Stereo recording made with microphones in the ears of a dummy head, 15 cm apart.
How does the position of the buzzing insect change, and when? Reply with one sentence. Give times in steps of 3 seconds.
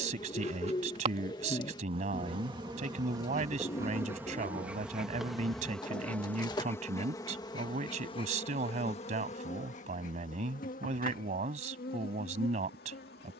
In this clip you hear the buzzing insect on the right from 0 s, in the centre from 3 s and on the left from 6 s.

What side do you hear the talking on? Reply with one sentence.
In this clip you hear the talking on the right.